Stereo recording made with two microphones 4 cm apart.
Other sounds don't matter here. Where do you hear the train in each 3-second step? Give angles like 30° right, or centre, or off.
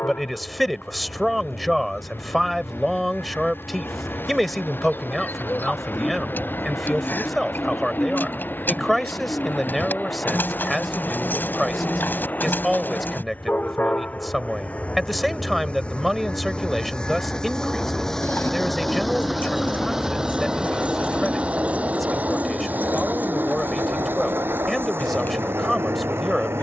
60° left, 60° left, 50° left, 50° left, 40° left, 30° left, centre, 40° right, 60° right.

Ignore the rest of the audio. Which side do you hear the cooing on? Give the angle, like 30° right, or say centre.
50° left.